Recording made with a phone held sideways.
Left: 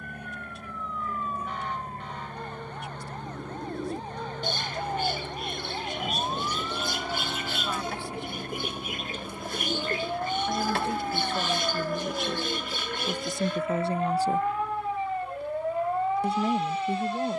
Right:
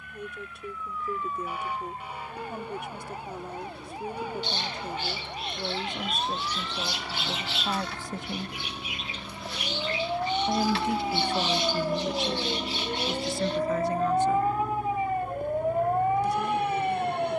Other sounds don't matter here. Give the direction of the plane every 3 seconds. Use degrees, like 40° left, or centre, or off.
50° left, 40° left, 20° left, centre, 30° right, 50° right.